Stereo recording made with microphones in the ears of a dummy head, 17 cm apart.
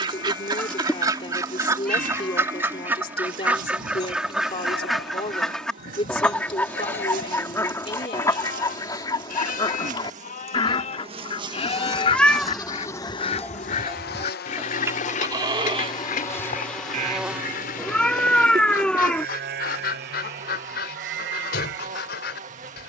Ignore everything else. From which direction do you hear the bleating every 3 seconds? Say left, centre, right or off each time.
left, left, left, left, centre, right, right, right.